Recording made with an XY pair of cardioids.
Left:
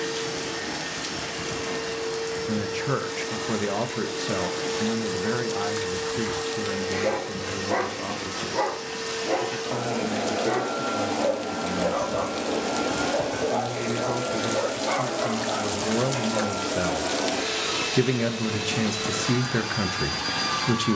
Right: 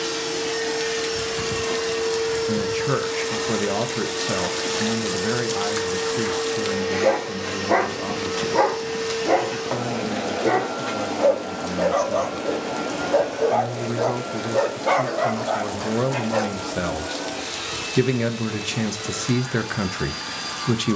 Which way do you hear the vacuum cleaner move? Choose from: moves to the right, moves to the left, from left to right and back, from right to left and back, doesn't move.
moves to the left.